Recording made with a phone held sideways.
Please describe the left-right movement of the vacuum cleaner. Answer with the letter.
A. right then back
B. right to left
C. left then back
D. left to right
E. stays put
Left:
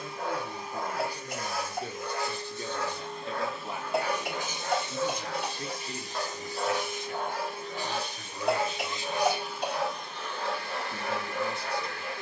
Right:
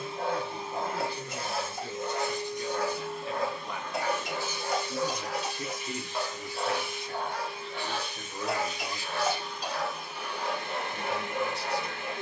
C.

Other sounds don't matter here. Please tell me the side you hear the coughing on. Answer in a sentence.
You can hear the coughing on the left.